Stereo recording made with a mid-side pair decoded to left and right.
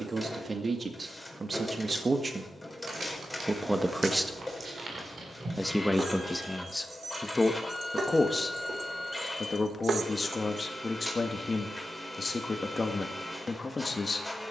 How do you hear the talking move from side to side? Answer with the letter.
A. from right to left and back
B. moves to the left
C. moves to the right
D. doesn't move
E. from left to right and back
B.